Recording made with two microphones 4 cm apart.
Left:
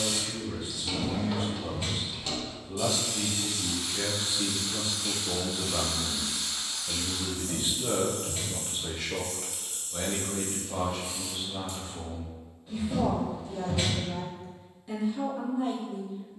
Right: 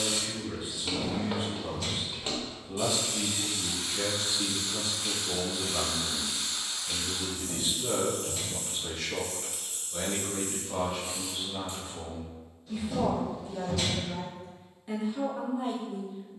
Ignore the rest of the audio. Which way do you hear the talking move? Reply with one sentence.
You can hear the talking move from right to left and back again.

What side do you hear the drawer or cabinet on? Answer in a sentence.
In this clip you hear the drawer or cabinet on the left.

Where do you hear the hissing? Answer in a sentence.
In this clip you hear the hissing on the right.